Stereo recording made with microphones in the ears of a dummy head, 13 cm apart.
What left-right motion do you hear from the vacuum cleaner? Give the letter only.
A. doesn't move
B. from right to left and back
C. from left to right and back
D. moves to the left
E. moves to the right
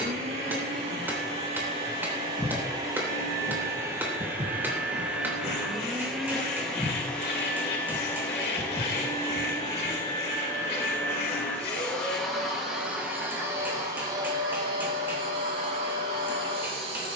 B.